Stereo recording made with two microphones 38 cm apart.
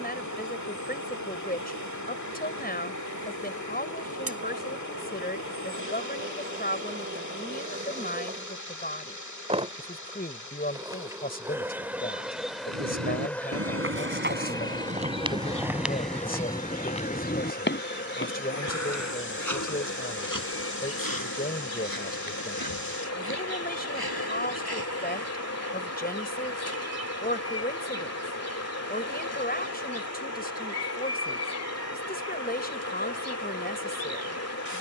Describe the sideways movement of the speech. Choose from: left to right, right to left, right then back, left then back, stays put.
stays put.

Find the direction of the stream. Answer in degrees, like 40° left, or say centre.
50° left.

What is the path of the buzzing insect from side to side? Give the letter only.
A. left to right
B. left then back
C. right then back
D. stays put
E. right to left
E.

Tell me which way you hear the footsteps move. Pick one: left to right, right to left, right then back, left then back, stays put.
right to left.